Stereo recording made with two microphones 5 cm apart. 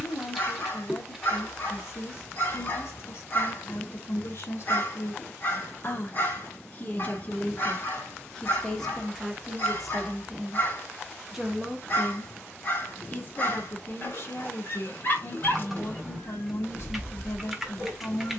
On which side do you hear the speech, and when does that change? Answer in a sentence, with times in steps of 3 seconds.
In this clip you hear the speech on the left from 0 s, in the centre from 9 s and on the left from 12 s.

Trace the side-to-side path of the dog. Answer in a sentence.
In this clip you hear the dog stay in one place.